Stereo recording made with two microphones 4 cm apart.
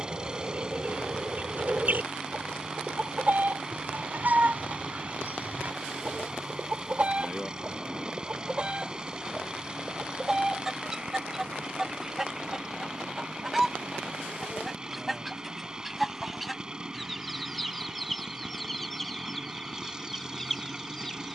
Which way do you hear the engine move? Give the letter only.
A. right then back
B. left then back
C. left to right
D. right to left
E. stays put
E.